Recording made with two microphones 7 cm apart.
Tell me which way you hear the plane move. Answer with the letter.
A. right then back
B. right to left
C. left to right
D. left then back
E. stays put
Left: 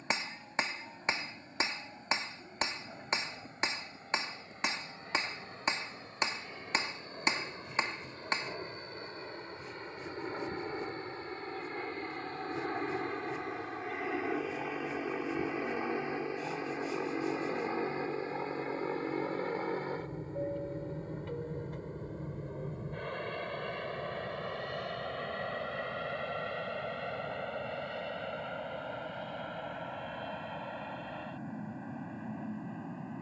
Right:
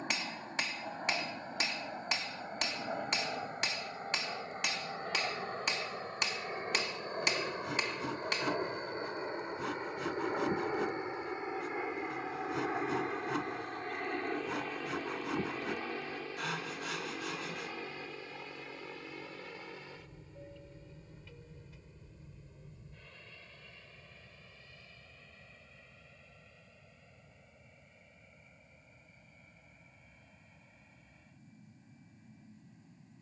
B.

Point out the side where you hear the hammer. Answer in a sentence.
In this clip you hear the hammer on the left.